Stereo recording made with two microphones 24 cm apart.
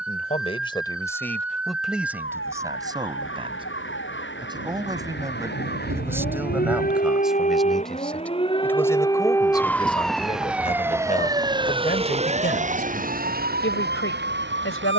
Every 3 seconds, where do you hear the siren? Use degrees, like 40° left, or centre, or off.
60° left, 50° left, 30° left, centre, 40° right.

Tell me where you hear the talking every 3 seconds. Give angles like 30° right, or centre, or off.
10° left, 20° right, centre, 30° left, 50° left.